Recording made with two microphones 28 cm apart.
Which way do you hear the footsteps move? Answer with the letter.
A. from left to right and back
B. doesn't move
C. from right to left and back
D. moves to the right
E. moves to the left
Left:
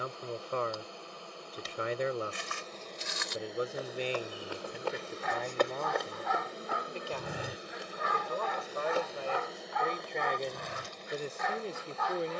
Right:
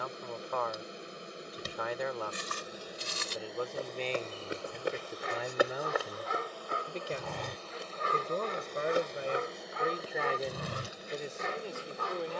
C.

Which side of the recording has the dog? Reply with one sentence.
In this clip you hear the dog on the right.